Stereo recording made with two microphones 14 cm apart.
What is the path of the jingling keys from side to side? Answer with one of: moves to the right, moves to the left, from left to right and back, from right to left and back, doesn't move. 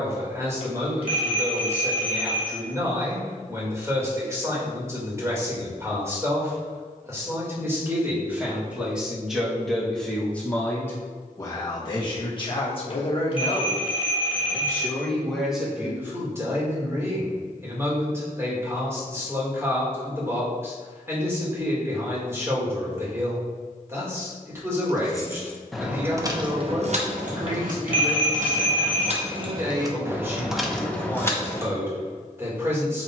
from left to right and back.